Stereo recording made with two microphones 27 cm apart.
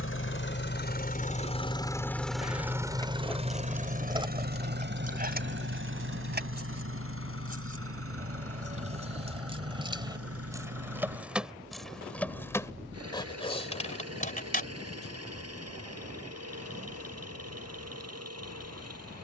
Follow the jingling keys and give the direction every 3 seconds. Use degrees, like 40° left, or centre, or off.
20° left, 20° right, 30° right, 10° right, 20° left, off, off.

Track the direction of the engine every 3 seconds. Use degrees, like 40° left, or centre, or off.
20° left, 40° right, 60° right, 60° right, 70° right, 70° right, 70° right.